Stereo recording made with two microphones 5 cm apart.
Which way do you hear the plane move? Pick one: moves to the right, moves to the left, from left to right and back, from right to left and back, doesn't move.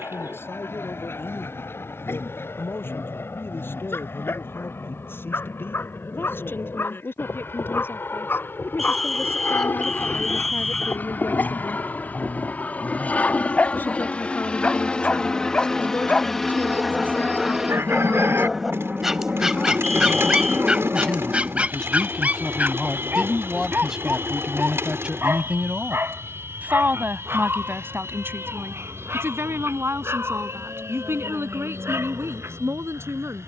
moves to the right.